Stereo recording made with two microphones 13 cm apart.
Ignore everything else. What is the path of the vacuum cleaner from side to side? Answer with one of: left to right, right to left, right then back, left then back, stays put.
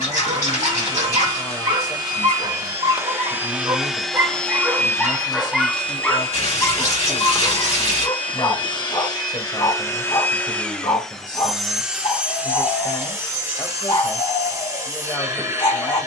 left then back.